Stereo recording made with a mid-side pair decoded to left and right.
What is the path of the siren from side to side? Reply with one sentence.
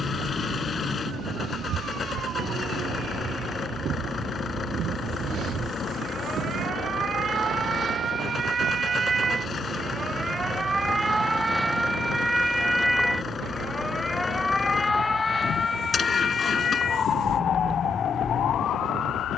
You can hear the siren go from the right side to the left.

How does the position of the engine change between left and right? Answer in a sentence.
You can hear the engine stay put.